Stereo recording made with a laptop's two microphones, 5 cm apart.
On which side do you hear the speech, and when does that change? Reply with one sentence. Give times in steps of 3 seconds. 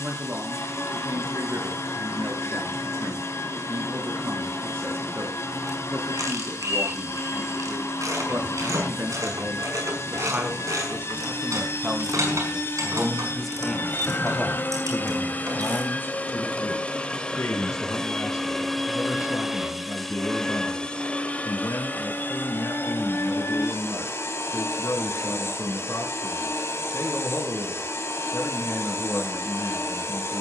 In this clip you hear the speech on the right from 0 s, in the centre from 12 s and on the left from 15 s.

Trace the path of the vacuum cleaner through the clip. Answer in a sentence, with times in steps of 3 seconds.
You can hear the vacuum cleaner on the left from 0 s, in the centre from 18 s and on the left from 21 s.